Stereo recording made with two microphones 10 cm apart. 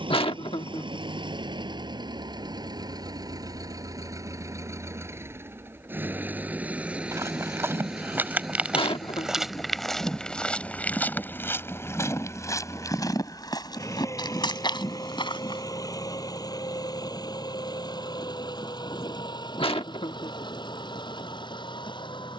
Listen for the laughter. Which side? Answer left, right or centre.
left.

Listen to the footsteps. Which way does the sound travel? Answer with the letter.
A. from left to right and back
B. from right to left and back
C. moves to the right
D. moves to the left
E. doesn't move
D.